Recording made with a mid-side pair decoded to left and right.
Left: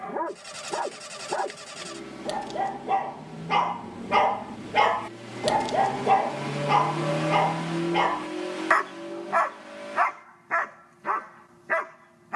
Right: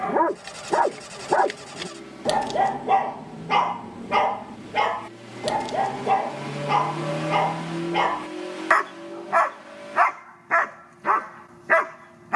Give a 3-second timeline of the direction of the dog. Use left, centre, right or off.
right, centre, centre, right.